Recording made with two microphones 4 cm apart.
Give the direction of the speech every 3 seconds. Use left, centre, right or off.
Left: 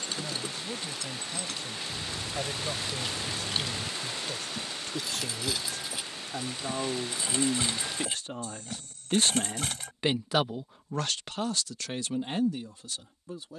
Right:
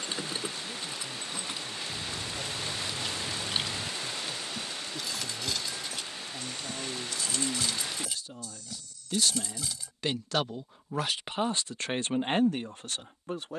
left, left, left, centre, right.